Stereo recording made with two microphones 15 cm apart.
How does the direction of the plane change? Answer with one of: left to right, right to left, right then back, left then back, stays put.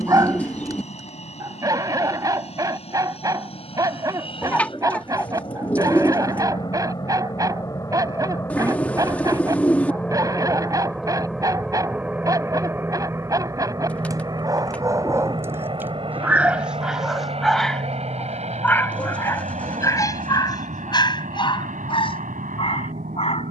left to right.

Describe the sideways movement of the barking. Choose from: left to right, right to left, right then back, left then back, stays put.
right to left.